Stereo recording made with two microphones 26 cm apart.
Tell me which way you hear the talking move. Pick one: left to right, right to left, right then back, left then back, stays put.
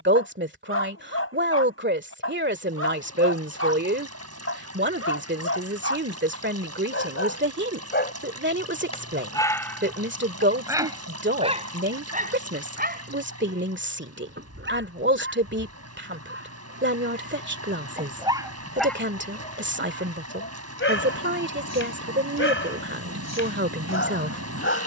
stays put.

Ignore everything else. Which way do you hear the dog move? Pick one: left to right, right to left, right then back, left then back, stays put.
right then back.